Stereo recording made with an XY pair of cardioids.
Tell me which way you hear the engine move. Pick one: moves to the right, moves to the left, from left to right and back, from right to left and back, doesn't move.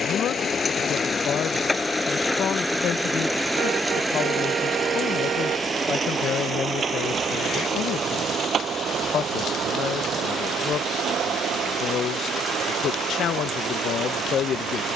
moves to the right.